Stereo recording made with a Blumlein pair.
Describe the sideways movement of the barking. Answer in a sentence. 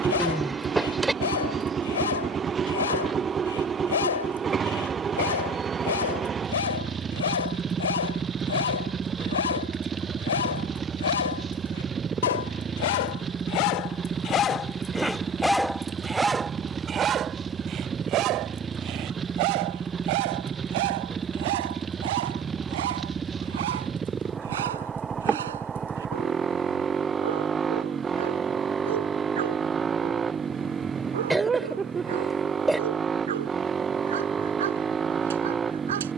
You can hear the barking move from left to right.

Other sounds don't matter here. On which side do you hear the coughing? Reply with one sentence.
You can hear the coughing in the centre.